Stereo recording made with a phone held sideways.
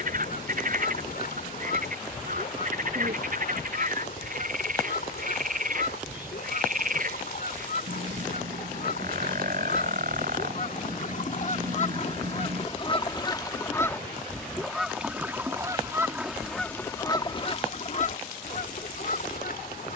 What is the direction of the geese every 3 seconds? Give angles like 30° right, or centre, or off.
70° left, 70° left, 70° left, 60° left, 20° left, 10° left, 60° left.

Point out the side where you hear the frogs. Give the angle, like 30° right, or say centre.
60° right.